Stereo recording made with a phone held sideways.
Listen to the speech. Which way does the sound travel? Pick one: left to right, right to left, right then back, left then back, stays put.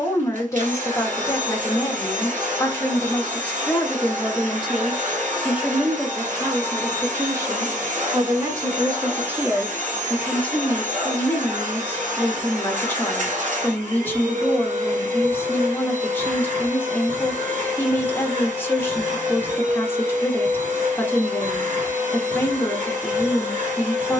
right then back.